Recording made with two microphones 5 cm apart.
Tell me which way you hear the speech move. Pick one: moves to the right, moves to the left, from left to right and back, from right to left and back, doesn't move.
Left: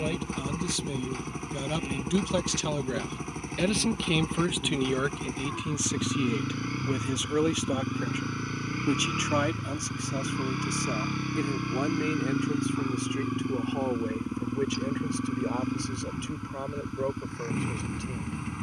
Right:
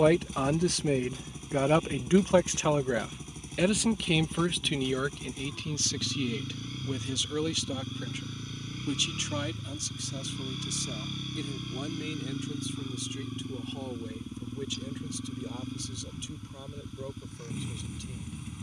moves to the left.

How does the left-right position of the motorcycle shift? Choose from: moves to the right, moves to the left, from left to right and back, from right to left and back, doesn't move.
doesn't move.